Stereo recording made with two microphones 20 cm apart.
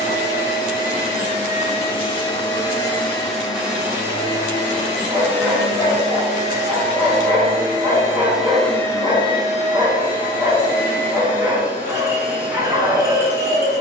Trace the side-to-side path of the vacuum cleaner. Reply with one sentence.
You can hear the vacuum cleaner move from left to right and back again.